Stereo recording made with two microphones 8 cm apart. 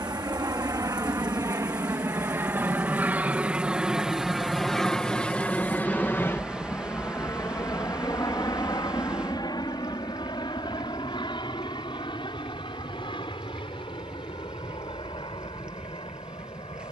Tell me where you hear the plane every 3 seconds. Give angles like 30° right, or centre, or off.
40° right, centre, 40° left, 60° left, 70° left, 70° left.